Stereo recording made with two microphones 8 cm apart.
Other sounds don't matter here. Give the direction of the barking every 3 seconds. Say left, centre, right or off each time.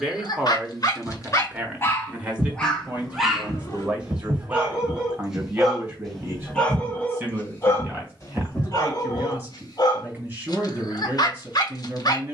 left, centre, left, left.